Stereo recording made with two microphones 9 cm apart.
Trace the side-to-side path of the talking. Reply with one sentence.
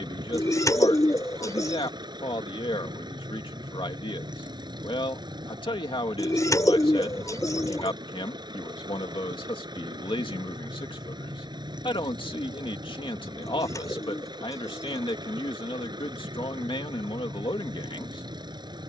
In this clip you hear the talking stay in one place.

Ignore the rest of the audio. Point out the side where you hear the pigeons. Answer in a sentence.
You can hear the pigeons on the left.